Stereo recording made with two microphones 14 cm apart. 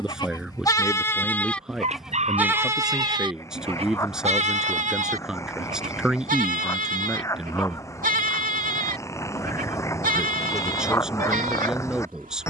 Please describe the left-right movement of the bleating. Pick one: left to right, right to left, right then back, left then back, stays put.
left to right.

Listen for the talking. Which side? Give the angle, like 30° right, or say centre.
centre.